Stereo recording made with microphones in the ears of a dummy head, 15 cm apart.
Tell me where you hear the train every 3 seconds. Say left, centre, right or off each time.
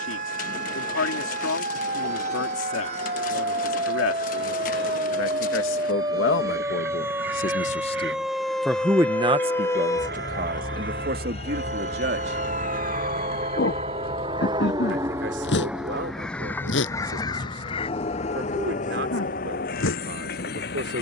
right, right, right, right, right, centre, left.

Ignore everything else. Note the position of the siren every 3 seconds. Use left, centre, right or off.
right, right, centre, left, left, left, left.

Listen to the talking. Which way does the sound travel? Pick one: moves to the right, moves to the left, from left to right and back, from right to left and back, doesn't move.
moves to the right.